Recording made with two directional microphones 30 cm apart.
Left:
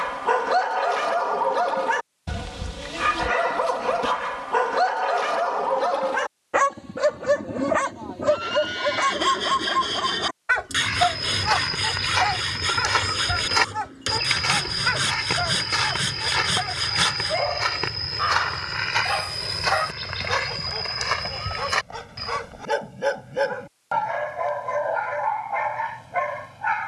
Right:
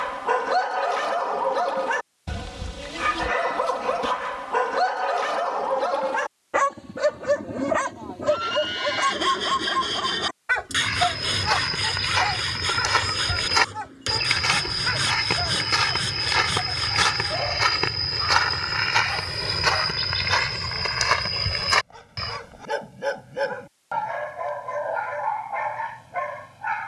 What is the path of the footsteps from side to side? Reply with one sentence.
In this clip you hear the footsteps move to the right.